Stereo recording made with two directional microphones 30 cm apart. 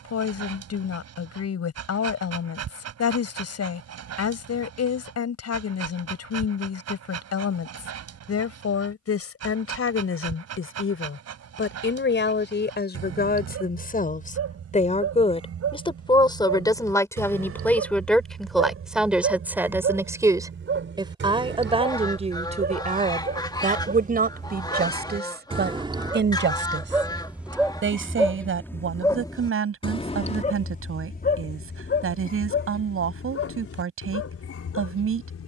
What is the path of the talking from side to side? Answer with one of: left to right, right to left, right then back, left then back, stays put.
left to right.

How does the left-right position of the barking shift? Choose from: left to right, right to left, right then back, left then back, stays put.
right to left.